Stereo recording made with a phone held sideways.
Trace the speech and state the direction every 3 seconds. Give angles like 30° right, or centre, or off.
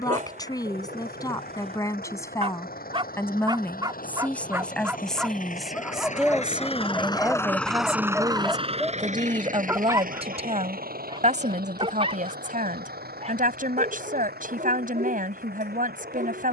20° left, 10° left, 10° right, 40° right, 60° right, 60° right.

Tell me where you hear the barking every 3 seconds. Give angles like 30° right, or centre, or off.
50° right, 20° right, 10° left, 30° right, 50° right, 60° right.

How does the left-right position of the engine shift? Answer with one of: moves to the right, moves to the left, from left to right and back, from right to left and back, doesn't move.
moves to the right.